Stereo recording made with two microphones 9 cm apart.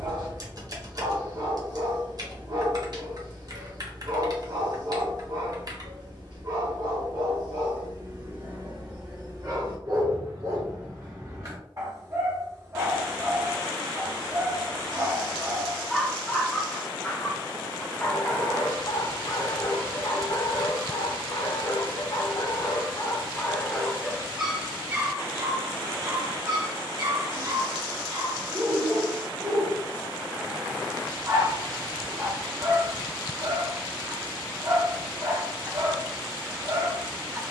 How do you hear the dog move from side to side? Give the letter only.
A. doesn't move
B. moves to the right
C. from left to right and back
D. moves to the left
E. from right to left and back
E.